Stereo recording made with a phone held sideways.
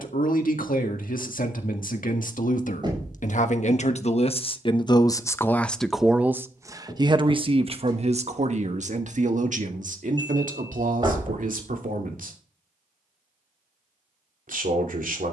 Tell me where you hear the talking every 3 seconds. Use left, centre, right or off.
left, left, right, right, right.